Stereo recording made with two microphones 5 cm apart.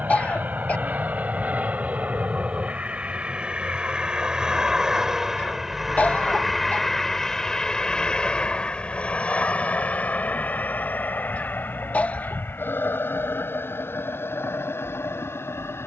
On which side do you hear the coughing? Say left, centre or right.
left.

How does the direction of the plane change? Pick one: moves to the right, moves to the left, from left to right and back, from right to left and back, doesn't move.
moves to the left.